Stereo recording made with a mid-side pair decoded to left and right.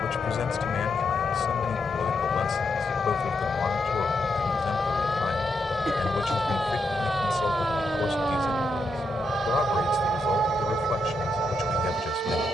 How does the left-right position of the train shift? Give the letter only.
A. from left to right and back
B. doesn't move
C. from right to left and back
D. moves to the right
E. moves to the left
B.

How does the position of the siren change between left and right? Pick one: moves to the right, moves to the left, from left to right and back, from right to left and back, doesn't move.
moves to the right.